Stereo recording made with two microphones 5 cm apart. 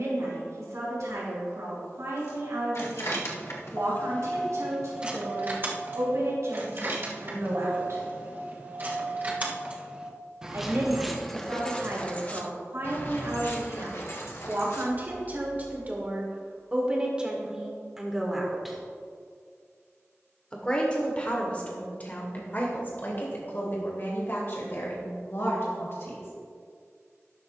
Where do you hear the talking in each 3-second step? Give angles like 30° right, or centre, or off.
70° right, 70° right, 70° right, 60° right, 50° right, 20° right, 10° left, 40° left, 50° left.